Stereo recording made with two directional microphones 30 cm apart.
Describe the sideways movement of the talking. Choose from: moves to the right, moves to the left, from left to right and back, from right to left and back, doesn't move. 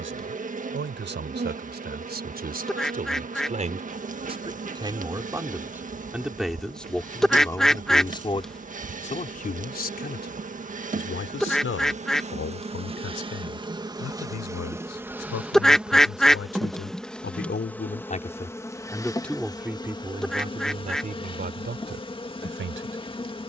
from right to left and back.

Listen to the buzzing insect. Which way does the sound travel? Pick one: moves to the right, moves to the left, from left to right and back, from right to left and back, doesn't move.
moves to the left.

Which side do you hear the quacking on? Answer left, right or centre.
centre.